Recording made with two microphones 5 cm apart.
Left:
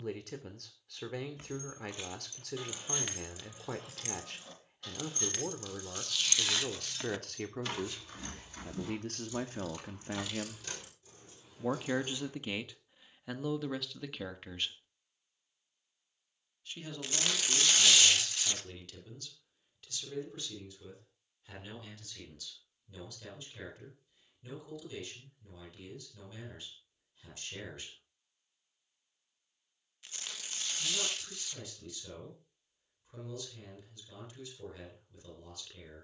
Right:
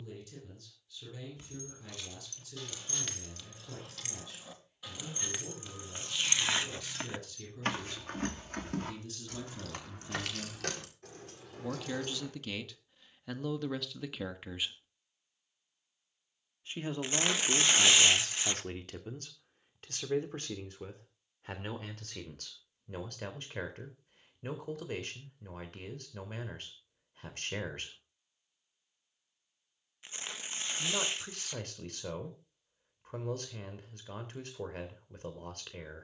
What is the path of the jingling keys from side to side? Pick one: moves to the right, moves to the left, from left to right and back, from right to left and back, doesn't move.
moves to the right.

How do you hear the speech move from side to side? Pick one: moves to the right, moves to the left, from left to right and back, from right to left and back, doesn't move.
moves to the right.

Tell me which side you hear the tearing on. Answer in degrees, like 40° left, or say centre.
30° right.